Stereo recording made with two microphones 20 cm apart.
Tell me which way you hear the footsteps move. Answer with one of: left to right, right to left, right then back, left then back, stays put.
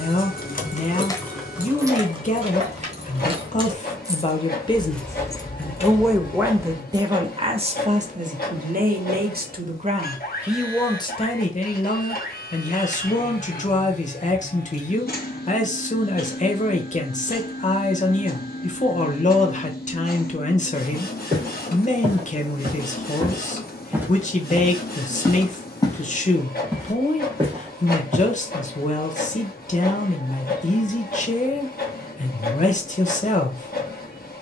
left then back.